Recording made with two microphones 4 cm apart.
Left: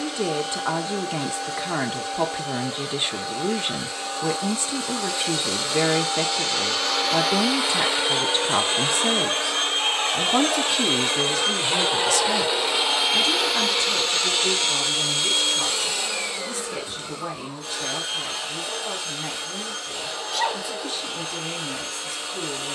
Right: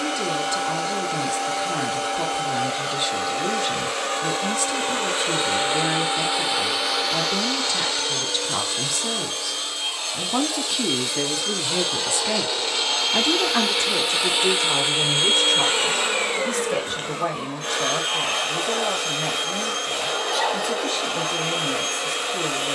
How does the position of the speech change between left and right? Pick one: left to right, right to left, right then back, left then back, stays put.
left to right.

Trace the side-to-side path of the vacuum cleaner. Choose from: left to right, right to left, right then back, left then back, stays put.
left then back.